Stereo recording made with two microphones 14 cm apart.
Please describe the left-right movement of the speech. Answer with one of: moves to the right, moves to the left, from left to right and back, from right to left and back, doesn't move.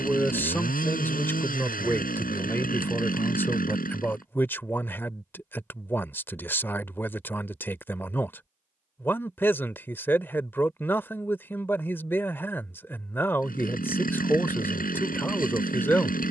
doesn't move.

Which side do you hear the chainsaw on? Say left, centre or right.
left.